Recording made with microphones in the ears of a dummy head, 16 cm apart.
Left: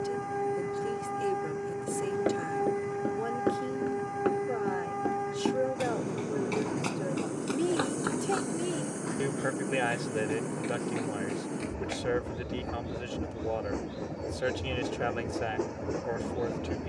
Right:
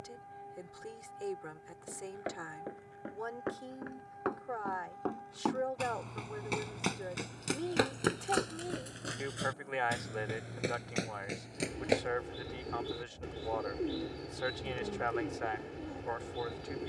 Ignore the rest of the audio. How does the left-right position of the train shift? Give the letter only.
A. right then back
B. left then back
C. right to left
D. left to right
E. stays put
E.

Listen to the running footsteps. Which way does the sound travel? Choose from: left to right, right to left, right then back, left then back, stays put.
left to right.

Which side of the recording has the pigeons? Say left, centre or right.
right.